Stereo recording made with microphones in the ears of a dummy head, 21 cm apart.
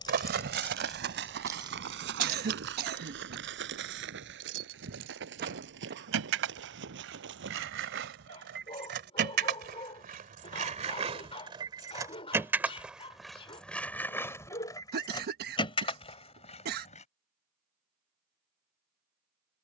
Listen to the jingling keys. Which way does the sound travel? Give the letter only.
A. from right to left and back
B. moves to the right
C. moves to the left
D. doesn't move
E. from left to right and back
E.